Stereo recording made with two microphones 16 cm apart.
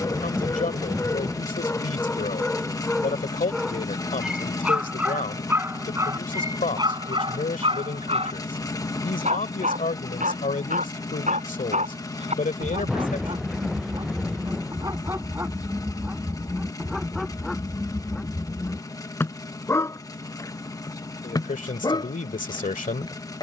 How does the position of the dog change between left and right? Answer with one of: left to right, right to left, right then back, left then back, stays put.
right then back.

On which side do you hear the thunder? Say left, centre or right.
centre.